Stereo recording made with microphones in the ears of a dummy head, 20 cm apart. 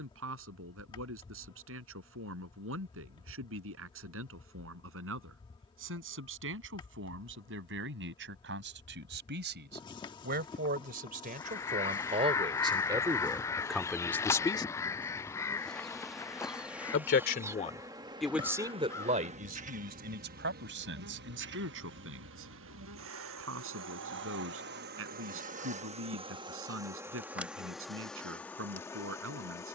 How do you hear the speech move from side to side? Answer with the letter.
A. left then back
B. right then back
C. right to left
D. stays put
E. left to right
A.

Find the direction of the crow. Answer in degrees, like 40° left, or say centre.
10° left.